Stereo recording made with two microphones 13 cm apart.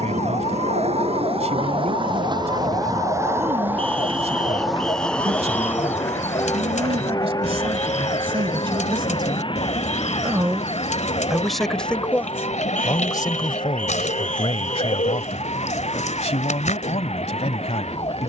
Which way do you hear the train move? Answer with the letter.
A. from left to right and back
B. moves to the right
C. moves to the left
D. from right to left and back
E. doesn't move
C.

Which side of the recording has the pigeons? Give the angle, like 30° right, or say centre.
70° left.